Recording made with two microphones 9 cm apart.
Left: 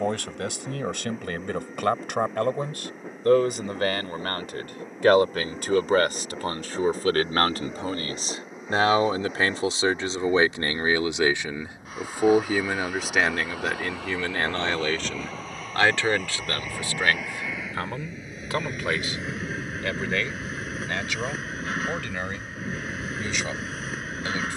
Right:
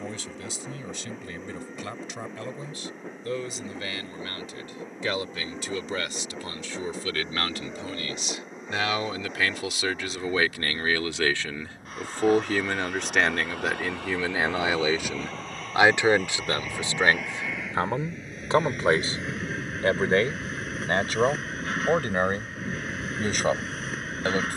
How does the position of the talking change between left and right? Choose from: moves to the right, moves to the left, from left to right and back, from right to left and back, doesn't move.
moves to the right.